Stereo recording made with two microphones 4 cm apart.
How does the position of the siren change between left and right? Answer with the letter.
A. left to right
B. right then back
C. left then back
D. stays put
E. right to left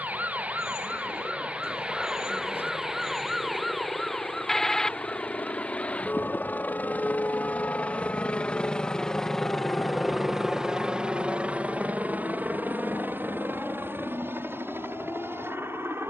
E.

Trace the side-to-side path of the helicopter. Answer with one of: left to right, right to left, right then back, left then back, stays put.
left to right.